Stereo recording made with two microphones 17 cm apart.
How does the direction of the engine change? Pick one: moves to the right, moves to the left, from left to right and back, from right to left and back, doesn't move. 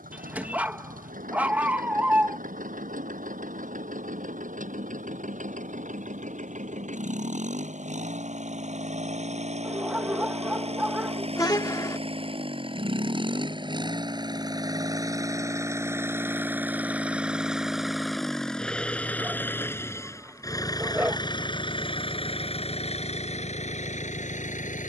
moves to the left.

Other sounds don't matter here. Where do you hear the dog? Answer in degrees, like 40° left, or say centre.
10° right.